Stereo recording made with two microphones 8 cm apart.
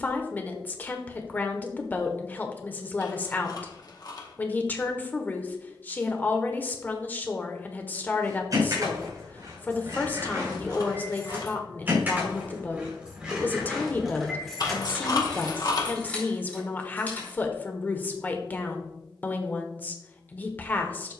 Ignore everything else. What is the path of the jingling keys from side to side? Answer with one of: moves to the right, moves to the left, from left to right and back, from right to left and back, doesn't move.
moves to the left.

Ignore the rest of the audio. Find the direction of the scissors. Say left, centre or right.
left.